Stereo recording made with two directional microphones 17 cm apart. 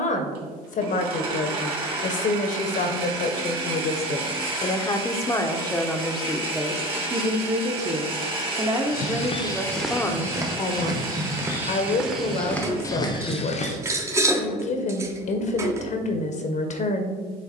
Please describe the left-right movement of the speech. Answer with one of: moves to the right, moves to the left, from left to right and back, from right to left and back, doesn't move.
from left to right and back.